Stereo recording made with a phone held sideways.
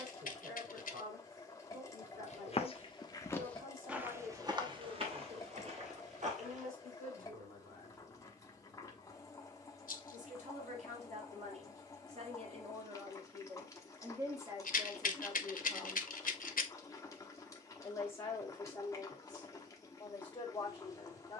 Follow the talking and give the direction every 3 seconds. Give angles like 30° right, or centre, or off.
70° right, 70° right, 70° right, 60° right, 30° right, centre, 30° left.